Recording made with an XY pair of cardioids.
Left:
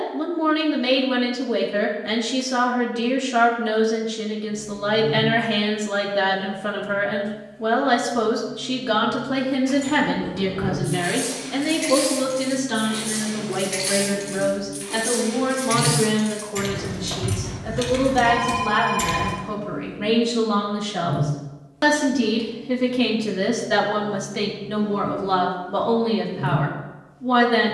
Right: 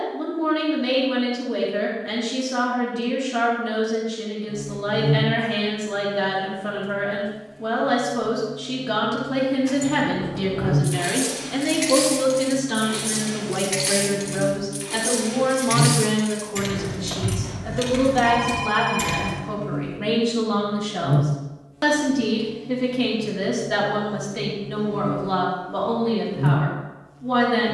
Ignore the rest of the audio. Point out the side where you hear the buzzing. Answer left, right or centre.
right.